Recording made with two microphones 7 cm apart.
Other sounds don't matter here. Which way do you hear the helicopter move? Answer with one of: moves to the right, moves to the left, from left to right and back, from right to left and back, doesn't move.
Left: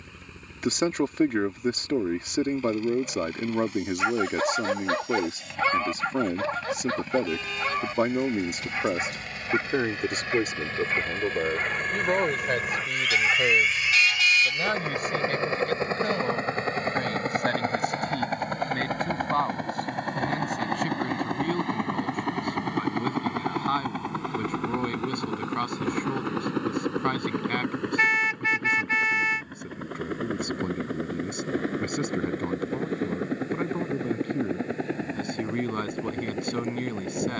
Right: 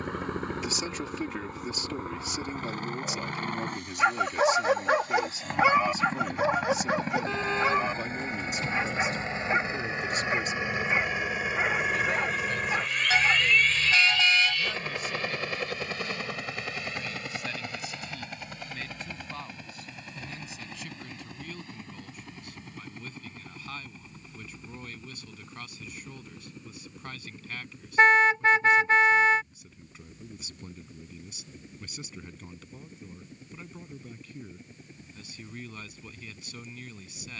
moves to the left.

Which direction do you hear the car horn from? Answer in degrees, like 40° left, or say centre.
30° right.